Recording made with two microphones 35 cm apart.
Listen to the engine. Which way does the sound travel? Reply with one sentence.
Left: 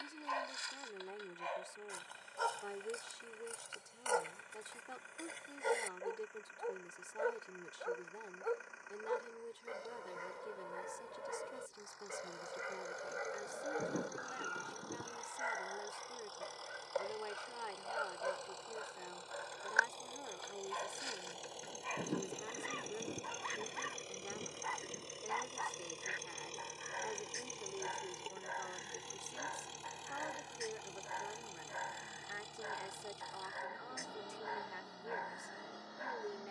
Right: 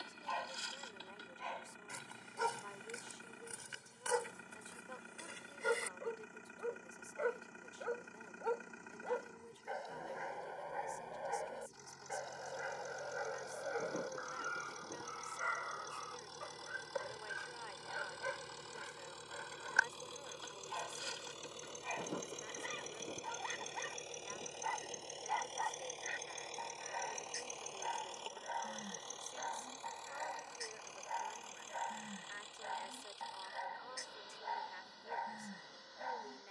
You can hear the engine go from the right side to the left.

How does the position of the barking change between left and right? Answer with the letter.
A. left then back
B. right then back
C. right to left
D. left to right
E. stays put
A.